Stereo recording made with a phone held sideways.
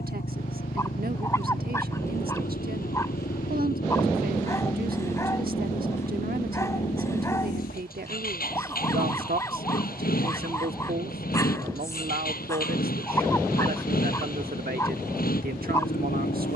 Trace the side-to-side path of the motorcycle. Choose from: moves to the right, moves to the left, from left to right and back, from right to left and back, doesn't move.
doesn't move.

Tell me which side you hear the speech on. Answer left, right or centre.
right.